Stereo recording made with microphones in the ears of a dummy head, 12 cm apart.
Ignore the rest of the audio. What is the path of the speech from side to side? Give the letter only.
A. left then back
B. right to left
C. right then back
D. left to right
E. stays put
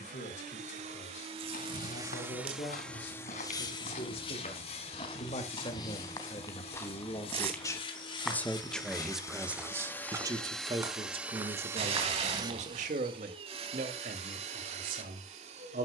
D.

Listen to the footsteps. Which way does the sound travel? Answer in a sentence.
You can hear the footsteps go from the left side to the right.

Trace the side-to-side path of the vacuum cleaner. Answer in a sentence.
In this clip you hear the vacuum cleaner move from right to left and back again.